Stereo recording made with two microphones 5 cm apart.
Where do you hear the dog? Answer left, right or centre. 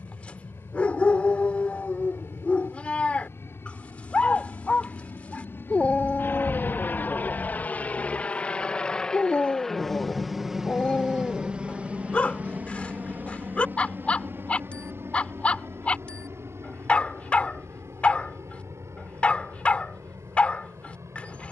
left.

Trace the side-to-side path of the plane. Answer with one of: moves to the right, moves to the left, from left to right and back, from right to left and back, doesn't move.
moves to the right.